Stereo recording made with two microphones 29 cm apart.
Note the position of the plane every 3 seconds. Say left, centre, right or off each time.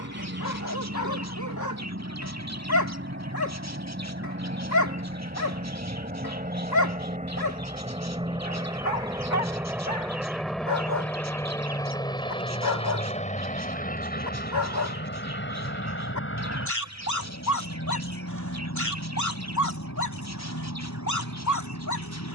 right, right, right, centre, left, left, left, left.